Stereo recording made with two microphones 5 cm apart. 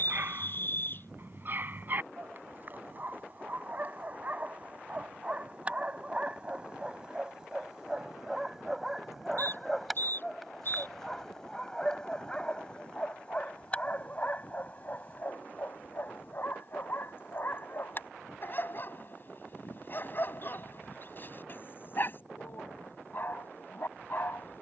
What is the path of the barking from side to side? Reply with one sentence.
You can hear the barking go from the right side to the left.